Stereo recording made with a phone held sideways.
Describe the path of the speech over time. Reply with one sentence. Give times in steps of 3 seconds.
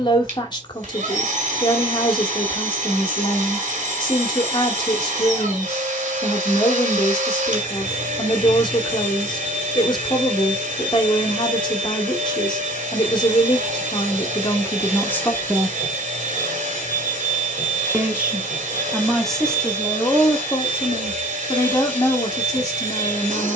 In this clip you hear the speech on the left from 0 s, in the centre from 15 s and on the left from 21 s.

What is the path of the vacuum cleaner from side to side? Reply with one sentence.
You can hear the vacuum cleaner stay put.